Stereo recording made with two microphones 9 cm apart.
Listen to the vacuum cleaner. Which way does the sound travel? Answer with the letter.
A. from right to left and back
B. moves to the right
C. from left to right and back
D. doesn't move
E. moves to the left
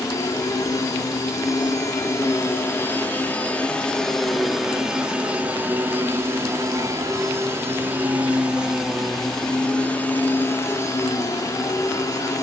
C.